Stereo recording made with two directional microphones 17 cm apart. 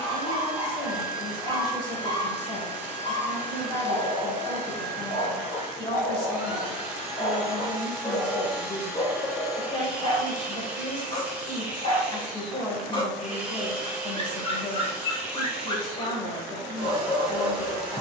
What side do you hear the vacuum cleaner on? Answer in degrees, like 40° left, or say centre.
10° right.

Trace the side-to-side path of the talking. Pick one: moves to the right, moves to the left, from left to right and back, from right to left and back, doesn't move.
doesn't move.